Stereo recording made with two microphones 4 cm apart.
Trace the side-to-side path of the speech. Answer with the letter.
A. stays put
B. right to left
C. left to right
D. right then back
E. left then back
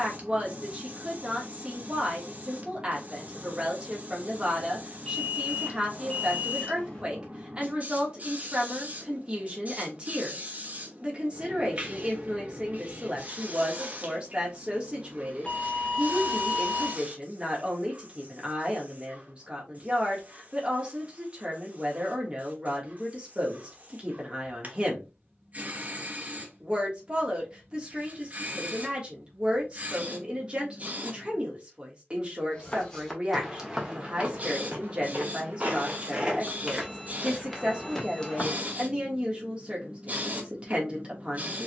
A.